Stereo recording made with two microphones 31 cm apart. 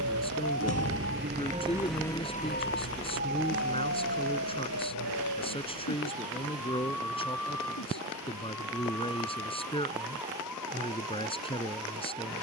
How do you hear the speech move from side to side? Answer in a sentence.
In this clip you hear the speech stay in one place.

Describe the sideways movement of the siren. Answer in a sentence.
You can hear the siren move from right to left.